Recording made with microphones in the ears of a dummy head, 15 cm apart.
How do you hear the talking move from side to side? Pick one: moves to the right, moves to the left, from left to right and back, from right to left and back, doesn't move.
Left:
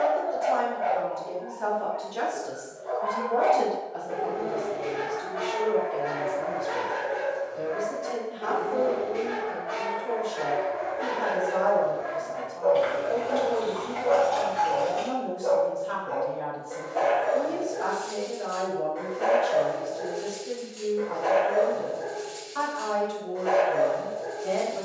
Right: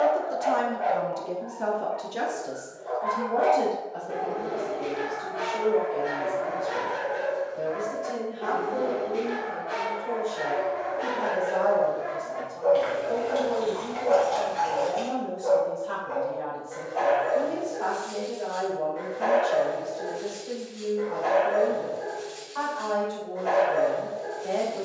moves to the left.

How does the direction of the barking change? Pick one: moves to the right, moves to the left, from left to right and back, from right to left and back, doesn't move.
moves to the left.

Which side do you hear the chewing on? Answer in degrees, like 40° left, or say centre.
20° right.